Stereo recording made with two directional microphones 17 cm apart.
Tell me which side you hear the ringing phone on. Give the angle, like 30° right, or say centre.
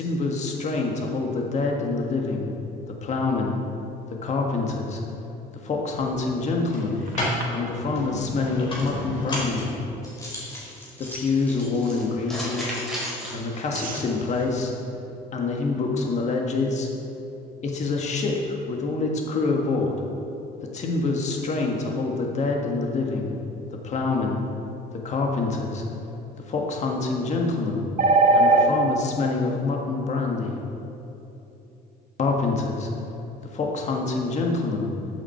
50° right.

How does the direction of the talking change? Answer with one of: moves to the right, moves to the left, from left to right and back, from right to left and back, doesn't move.
doesn't move.